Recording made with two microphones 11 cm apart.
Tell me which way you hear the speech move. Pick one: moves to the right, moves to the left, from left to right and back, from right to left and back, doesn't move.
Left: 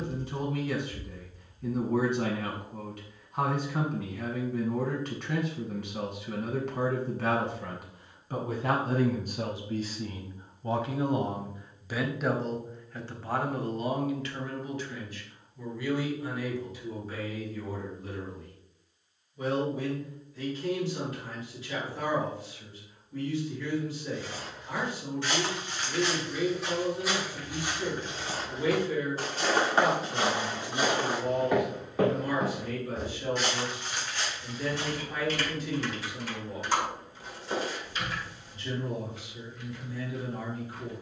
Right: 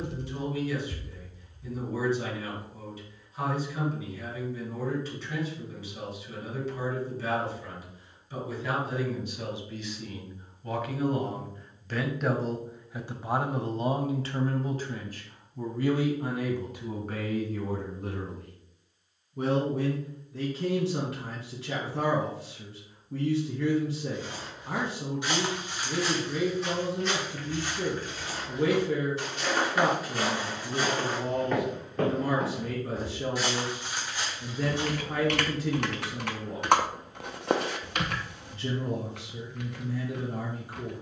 moves to the right.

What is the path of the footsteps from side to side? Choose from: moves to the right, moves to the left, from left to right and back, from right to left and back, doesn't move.
from right to left and back.